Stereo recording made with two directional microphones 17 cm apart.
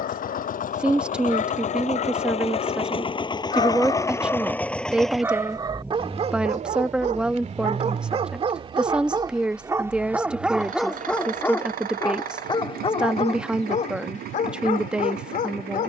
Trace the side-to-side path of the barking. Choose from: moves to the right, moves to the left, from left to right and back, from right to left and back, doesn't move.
from left to right and back.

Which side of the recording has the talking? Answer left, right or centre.
centre.